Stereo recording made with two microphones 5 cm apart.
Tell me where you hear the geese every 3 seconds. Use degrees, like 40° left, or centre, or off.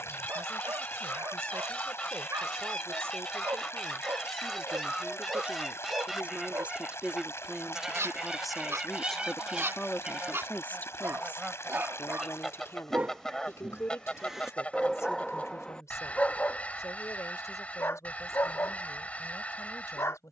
20° left, 10° left, 10° right, 10° right, 10° left, 30° left, 30° left.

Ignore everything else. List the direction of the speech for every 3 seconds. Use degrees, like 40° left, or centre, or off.
60° right, 40° right, 10° right, 30° left, 60° left, 70° left, 80° left.